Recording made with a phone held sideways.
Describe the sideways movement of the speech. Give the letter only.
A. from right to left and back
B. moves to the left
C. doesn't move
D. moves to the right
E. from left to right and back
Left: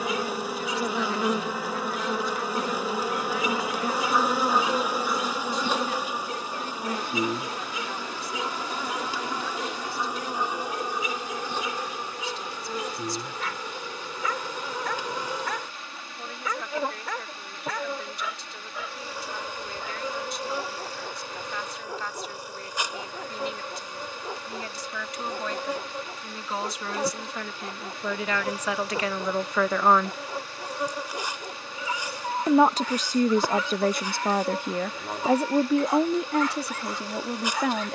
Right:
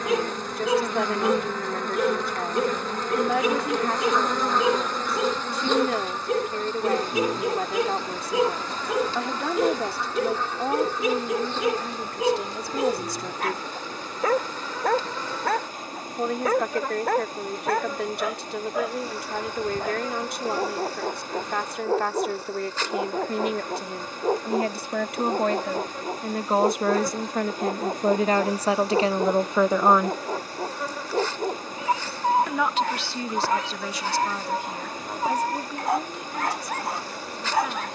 B.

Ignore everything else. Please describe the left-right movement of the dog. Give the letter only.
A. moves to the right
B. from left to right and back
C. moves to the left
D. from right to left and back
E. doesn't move
E.